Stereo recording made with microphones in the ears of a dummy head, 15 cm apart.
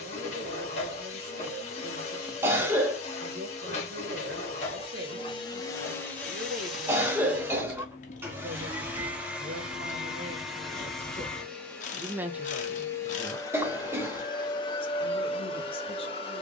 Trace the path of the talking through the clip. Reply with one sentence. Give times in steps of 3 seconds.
You can hear the talking on the right from 0 s, in the centre from 12 s and on the left from 15 s.